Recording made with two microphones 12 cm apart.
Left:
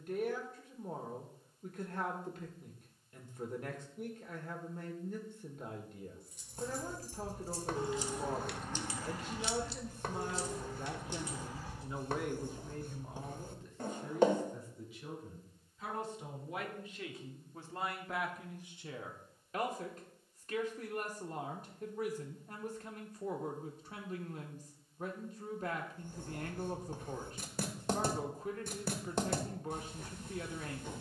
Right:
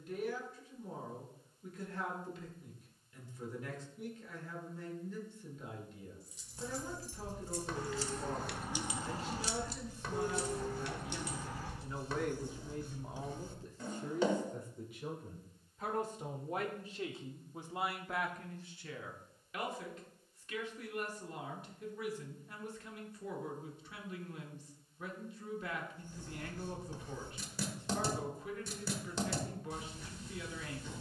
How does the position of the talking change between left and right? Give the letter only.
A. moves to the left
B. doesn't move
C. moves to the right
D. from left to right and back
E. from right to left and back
D.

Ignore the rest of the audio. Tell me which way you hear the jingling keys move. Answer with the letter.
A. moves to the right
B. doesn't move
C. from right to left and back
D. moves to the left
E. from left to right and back
A.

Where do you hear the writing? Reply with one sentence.
You can hear the writing on the left.